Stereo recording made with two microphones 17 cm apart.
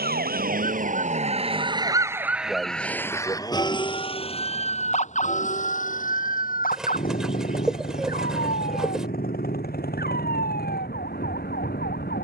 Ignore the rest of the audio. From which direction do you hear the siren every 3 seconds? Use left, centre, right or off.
right, left, left, left.